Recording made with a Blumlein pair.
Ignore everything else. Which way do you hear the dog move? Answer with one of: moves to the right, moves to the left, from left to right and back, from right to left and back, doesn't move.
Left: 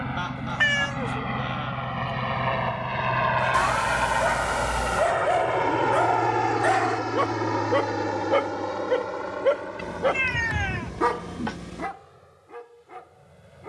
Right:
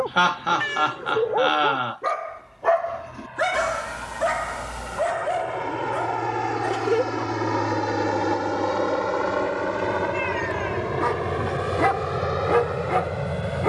from right to left and back.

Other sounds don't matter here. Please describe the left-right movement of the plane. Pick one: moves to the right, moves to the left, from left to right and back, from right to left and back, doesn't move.
moves to the right.